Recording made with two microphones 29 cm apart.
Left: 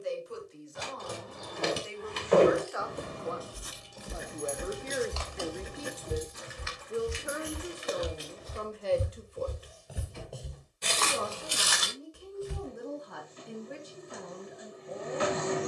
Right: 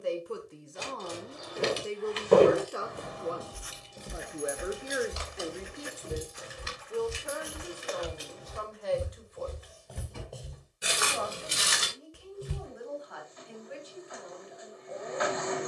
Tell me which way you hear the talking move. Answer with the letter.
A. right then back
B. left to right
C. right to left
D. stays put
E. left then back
C.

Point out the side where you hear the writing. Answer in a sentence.
You can hear the writing on the left.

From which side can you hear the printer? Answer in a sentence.
In this clip you hear the printer on the left.